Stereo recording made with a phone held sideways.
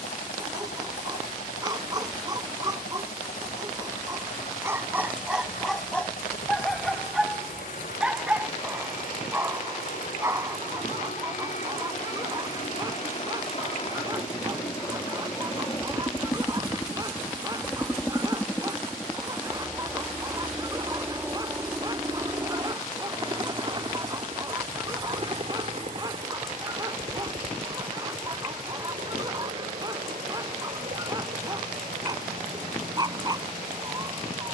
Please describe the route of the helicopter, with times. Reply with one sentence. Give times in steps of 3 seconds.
In this clip you hear the helicopter on the left from 0 s, in the centre from 18 s and on the right from 21 s.